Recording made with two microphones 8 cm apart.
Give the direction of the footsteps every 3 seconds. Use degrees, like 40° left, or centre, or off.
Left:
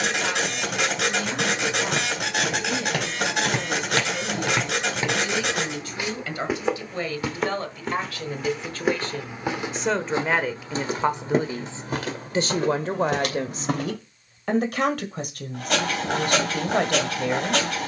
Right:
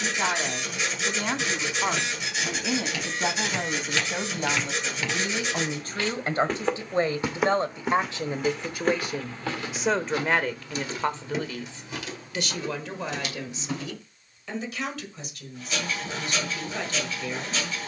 60° left, 40° left, centre, 30° left, 60° left, off.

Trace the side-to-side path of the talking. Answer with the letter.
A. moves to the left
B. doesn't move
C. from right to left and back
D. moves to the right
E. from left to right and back
A.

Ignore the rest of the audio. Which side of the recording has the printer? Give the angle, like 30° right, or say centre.
80° left.